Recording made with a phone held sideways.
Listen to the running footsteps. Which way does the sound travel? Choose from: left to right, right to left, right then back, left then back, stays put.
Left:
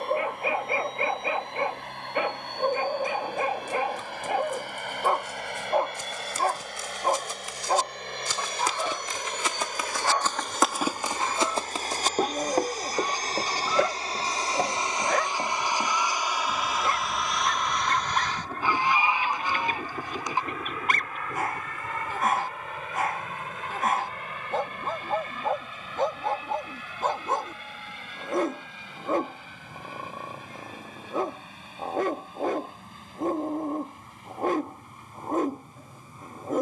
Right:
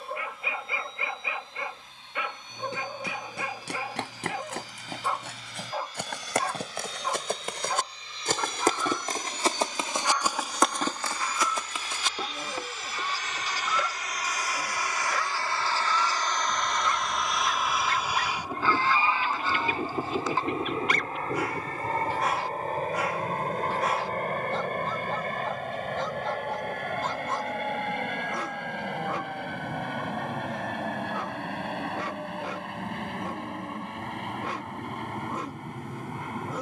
right to left.